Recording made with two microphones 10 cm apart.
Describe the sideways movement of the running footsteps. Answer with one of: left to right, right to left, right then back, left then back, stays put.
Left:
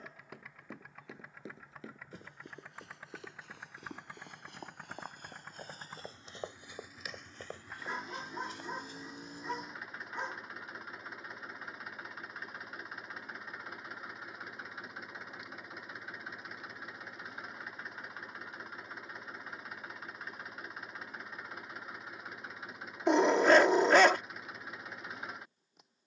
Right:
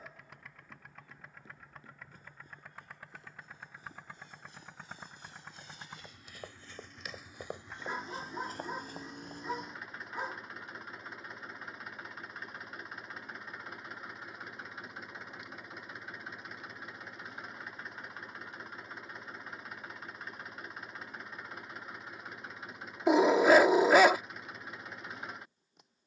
left to right.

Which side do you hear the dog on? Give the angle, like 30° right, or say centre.
10° right.